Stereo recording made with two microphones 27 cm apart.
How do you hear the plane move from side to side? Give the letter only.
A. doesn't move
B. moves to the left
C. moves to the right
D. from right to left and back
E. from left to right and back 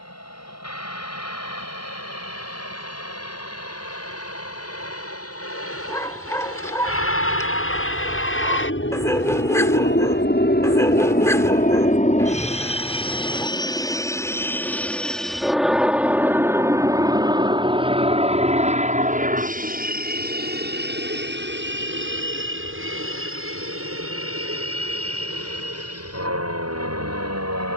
C.